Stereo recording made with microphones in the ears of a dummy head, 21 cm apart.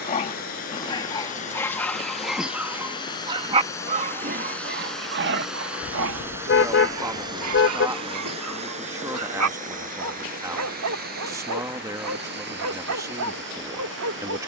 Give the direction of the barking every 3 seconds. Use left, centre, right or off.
centre, right, right, right, right.